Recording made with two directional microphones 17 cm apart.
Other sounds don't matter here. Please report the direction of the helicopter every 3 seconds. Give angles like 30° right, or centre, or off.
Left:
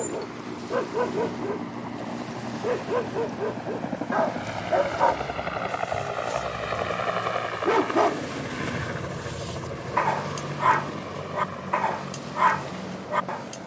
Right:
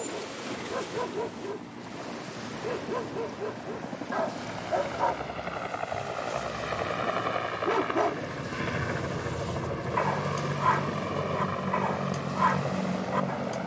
50° left, 30° left, 10° left, 20° right, 40° right.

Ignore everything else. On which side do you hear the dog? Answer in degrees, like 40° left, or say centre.
30° left.